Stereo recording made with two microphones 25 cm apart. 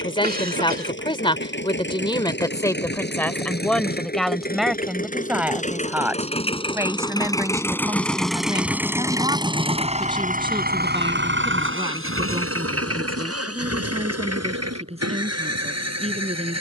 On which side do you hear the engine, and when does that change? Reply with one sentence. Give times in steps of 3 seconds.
In this clip you hear the engine on the left from 0 s, in the centre from 6 s and on the right from 9 s.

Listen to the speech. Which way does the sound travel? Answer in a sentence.
You can hear the speech travel towards the right.